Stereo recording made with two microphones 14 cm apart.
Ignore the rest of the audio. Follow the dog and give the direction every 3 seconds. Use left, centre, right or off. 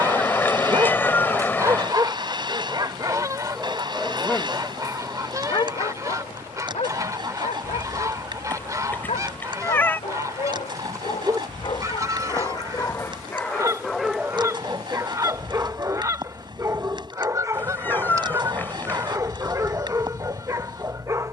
right, centre, left, left, centre, right, right.